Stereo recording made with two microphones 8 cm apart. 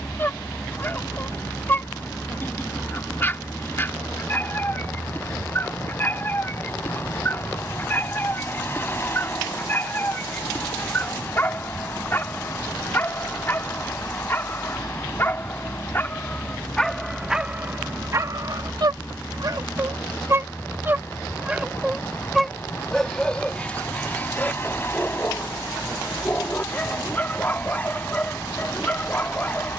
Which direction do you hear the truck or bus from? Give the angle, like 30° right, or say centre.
30° left.